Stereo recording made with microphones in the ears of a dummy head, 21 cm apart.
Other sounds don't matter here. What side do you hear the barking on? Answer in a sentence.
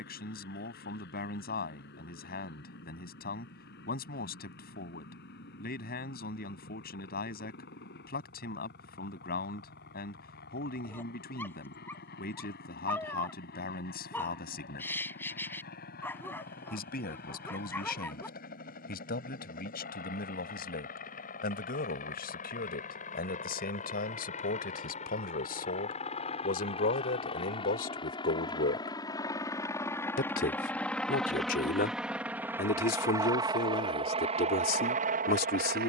In this clip you hear the barking in the centre.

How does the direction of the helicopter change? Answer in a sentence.
You can hear the helicopter go from the left side to the right.